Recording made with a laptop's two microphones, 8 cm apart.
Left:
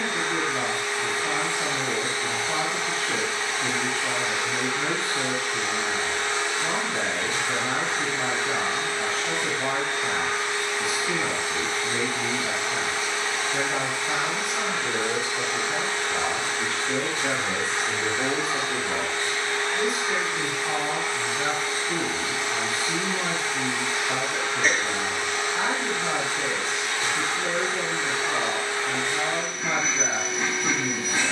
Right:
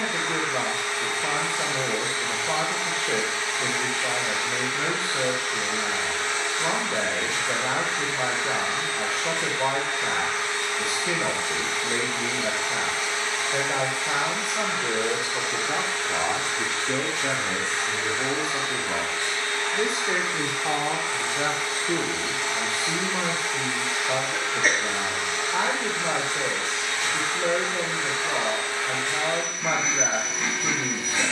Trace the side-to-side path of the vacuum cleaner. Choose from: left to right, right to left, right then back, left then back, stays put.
stays put.